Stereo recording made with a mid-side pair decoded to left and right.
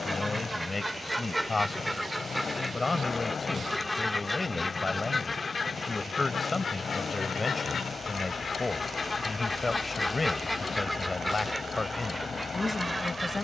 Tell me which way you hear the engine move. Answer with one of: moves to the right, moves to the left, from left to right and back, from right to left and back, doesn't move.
doesn't move.